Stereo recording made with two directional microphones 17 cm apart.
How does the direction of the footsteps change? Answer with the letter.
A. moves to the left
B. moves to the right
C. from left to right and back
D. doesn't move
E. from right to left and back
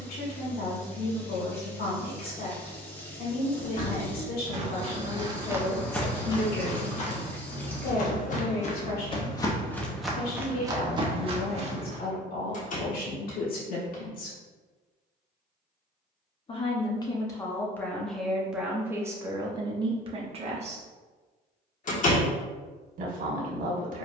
E.